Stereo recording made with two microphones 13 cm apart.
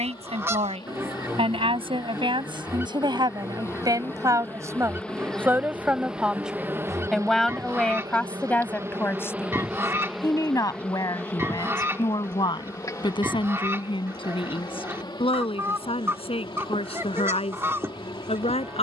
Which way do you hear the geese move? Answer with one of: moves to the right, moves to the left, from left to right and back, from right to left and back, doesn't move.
doesn't move.